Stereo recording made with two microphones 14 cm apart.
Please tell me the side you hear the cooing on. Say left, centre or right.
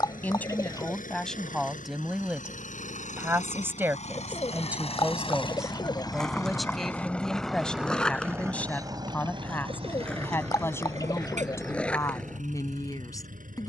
left.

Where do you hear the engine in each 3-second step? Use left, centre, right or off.
left, left, centre, right, right.